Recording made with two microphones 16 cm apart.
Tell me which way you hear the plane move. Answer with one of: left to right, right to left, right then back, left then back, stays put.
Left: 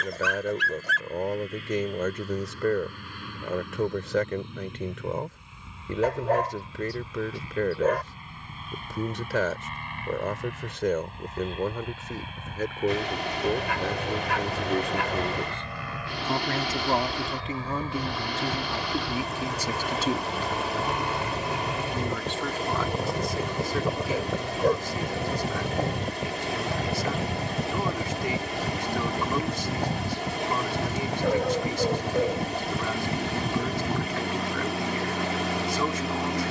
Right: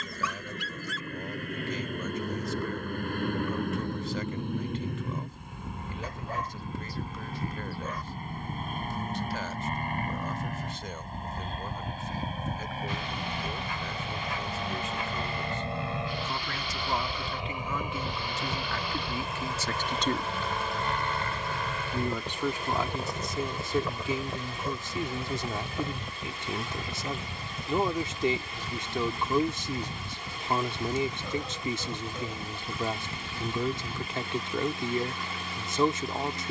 right to left.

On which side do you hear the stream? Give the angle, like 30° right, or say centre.
70° left.